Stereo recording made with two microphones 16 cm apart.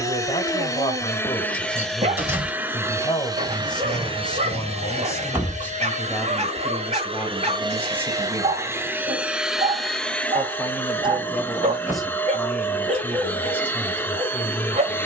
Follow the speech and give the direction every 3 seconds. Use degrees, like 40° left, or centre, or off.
30° left, 20° left, 10° right, 10° right, 10° left.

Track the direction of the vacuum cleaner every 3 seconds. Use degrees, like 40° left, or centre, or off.
10° left, 40° right, 30° right, 10° left, 10° left.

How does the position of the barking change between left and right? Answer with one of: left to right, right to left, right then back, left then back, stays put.
stays put.